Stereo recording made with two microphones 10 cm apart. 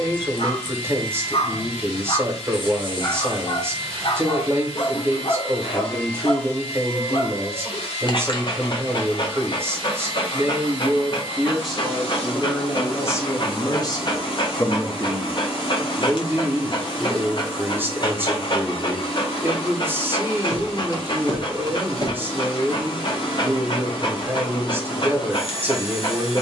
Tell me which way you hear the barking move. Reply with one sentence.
In this clip you hear the barking stay in one place.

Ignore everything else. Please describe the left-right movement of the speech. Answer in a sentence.
In this clip you hear the speech move from right to left and back again.